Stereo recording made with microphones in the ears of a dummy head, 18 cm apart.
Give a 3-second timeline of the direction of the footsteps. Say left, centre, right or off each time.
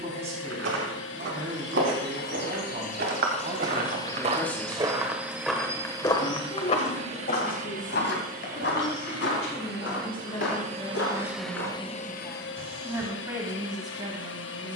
right, right, left, left, off.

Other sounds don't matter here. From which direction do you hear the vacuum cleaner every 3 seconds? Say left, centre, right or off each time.
left, centre, right, right, left.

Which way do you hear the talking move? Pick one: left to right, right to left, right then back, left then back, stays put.
left then back.